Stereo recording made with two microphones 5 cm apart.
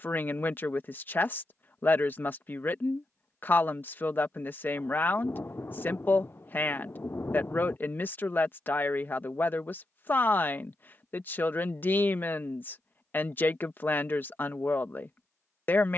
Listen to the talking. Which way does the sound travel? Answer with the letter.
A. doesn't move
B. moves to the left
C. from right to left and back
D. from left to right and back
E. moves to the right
A.